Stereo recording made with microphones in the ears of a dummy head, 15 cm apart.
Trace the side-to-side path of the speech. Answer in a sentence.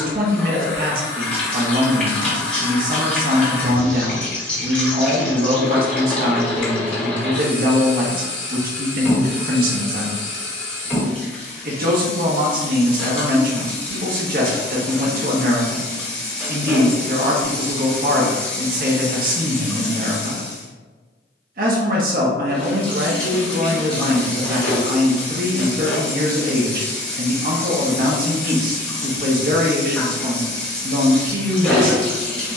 You can hear the speech stay in one place.